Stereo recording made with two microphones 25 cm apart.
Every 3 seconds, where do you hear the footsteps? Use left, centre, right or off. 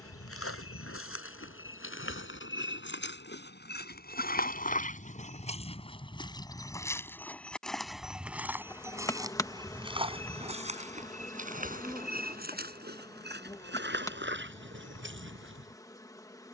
left, left, centre, right, right, right.